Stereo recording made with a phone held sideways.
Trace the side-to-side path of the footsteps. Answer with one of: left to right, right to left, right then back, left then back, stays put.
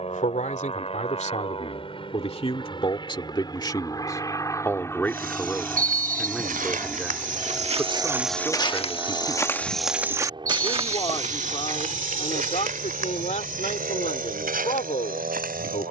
left then back.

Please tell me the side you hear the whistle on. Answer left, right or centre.
right.